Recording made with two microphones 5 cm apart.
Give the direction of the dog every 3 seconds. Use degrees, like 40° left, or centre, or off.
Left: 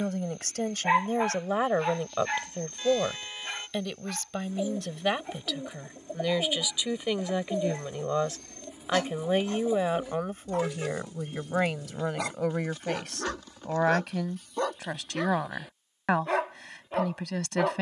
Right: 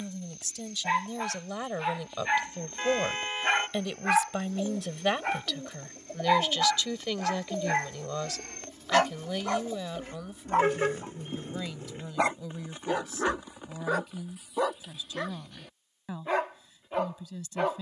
centre, 60° right, 60° right, 40° right, 20° right, centre.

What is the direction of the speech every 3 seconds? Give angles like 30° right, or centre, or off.
40° left, centre, 20° left, 50° left, 60° left, 70° left.